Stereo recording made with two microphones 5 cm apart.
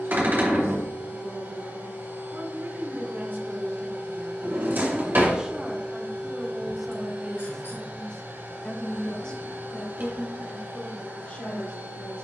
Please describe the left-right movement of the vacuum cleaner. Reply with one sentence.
You can hear the vacuum cleaner stay put.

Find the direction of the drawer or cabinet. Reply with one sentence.
You can hear the drawer or cabinet on the right.